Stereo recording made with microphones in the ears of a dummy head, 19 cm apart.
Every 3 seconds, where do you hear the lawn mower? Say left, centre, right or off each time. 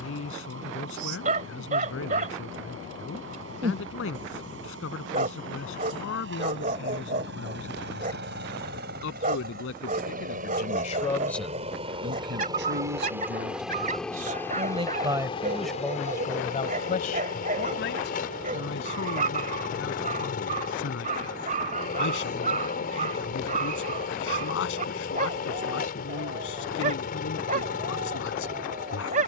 right, right, right, right, centre, left, left, left, left, left.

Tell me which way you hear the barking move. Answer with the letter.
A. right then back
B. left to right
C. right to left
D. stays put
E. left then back
D.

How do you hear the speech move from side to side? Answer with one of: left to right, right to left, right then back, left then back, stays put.
right then back.